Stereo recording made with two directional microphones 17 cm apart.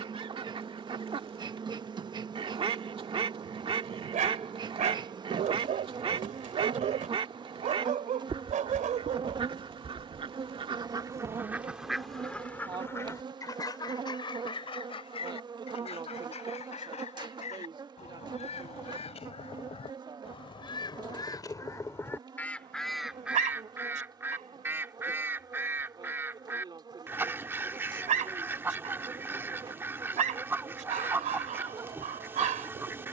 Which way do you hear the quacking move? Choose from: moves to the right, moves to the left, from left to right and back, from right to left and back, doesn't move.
from right to left and back.